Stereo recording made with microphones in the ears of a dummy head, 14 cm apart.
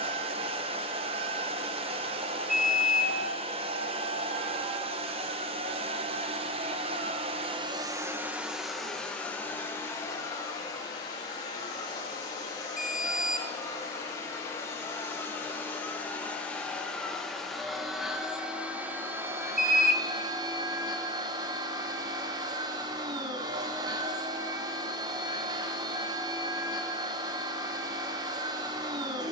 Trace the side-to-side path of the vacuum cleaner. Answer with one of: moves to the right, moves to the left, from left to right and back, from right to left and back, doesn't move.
from right to left and back.